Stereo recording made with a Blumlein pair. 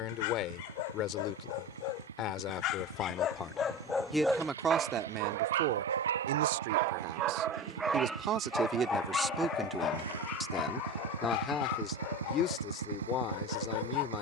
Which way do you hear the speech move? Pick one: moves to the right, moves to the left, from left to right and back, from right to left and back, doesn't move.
from left to right and back.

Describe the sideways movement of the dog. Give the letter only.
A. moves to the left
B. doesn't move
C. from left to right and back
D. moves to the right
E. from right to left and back
C.